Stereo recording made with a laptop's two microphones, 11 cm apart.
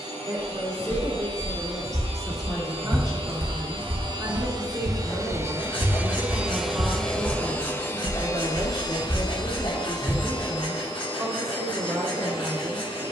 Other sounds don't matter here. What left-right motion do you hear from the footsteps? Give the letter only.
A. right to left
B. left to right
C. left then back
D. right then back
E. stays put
D.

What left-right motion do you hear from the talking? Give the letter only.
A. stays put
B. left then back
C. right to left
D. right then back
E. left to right
A.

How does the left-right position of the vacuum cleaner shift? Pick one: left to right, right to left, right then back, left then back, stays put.
right to left.